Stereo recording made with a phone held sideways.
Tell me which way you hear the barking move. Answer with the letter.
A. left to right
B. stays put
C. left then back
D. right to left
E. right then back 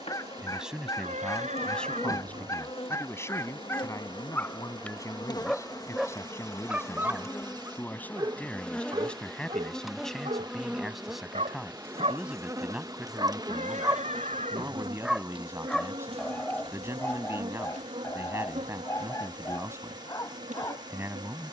E.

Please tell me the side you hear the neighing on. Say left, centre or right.
right.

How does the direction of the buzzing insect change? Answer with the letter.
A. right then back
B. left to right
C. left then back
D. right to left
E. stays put
B.